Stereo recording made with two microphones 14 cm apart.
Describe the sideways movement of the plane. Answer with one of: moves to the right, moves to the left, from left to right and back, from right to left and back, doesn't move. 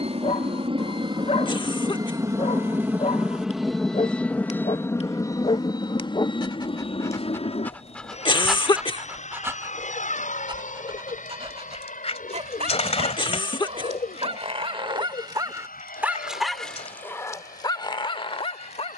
moves to the left.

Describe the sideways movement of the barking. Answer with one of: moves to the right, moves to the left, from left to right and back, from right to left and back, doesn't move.
from left to right and back.